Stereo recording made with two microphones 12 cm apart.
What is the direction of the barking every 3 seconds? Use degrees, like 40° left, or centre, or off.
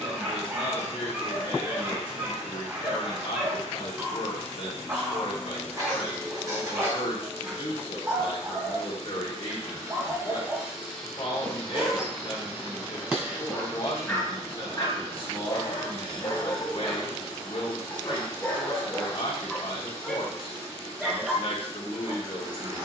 20° right, 20° right, 20° right, 20° right, 10° left, 30° left, 10° left, 10° right.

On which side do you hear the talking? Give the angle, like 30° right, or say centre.
50° left.